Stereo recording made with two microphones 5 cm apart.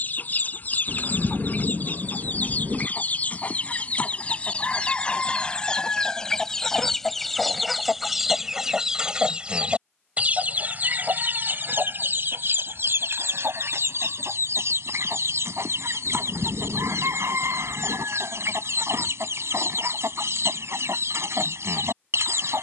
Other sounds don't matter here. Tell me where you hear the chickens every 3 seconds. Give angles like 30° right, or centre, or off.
40° left, 30° left, centre, 30° right, 60° right, 70° right, 70° right, 70° right.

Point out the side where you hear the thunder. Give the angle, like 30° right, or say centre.
60° right.